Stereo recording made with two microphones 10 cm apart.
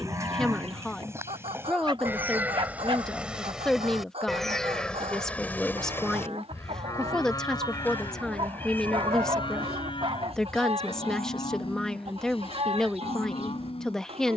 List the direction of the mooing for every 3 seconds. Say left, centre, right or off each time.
right, centre, left, left, left.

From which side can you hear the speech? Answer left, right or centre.
centre.